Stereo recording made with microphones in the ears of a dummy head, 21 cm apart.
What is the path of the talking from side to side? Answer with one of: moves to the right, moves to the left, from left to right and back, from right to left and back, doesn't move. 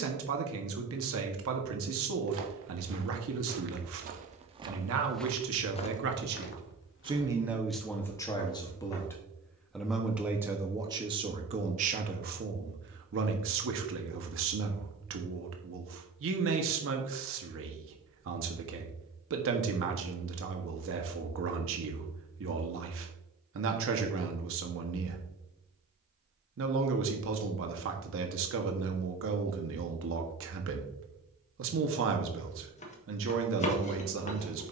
from right to left and back.